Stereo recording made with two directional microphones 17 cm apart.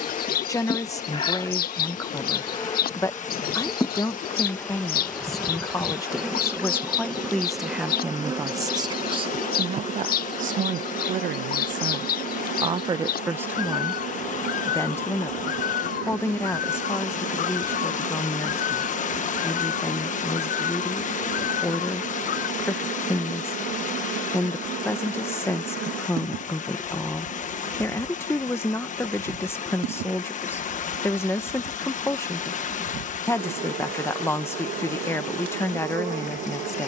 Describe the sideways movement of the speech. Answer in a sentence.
You can hear the speech move from left to right and back again.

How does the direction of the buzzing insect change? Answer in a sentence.
In this clip you hear the buzzing insect move from left to right.